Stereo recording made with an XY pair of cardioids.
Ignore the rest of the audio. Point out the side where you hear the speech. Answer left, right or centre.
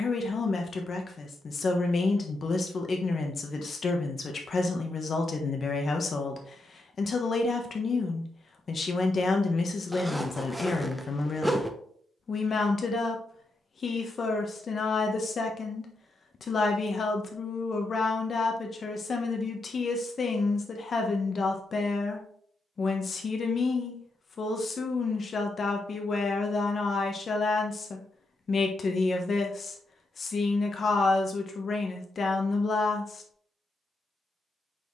left.